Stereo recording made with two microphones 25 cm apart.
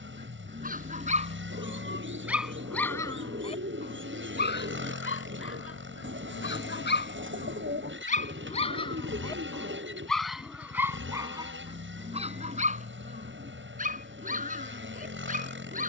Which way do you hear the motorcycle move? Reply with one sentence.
You can hear the motorcycle stay in one place.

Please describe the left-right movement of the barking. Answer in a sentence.
In this clip you hear the barking go left and come back.